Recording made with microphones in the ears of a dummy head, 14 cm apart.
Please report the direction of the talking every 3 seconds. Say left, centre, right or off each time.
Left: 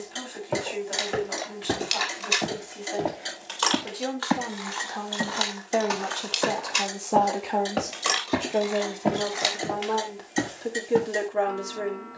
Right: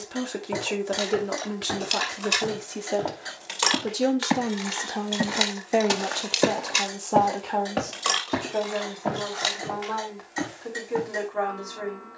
right, right, centre, left.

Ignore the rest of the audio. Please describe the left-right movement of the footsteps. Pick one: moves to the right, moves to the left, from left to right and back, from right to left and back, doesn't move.
from left to right and back.